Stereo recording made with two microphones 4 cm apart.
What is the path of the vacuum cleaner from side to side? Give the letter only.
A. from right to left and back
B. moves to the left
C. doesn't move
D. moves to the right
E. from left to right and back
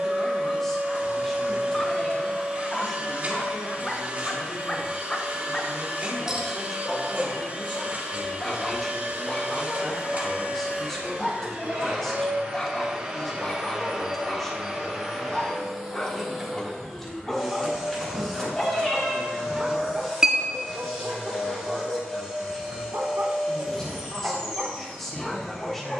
B.